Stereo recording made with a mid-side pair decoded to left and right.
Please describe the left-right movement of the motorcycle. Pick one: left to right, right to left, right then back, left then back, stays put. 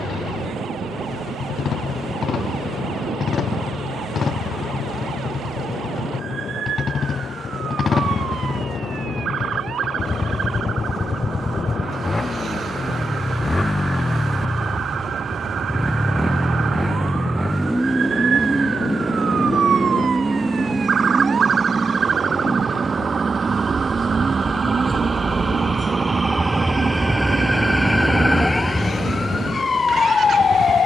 left to right.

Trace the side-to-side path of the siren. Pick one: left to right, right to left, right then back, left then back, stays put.
right to left.